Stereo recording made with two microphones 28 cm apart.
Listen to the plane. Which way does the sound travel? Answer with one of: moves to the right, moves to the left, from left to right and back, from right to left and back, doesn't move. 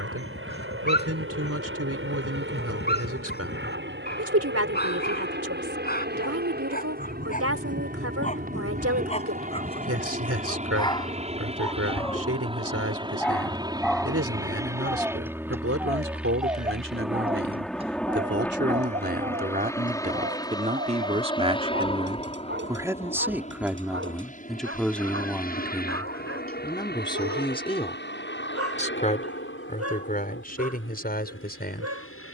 moves to the left.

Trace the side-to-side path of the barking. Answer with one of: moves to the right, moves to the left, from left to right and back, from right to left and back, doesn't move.
moves to the right.